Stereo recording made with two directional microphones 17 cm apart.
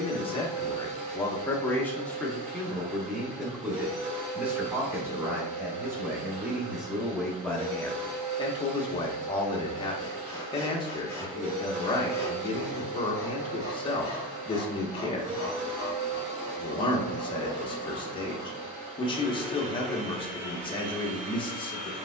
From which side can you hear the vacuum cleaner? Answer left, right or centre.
right.